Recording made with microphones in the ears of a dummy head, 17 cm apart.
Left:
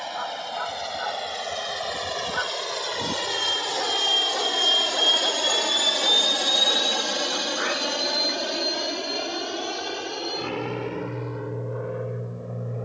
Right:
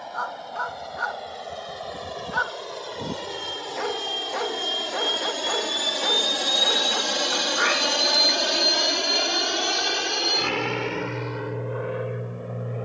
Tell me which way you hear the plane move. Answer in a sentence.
In this clip you hear the plane travel towards the right.